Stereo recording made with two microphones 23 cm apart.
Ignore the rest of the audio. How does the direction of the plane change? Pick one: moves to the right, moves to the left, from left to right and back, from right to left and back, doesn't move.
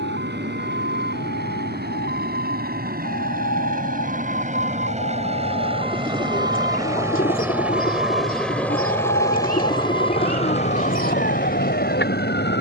moves to the left.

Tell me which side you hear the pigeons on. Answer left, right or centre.
left.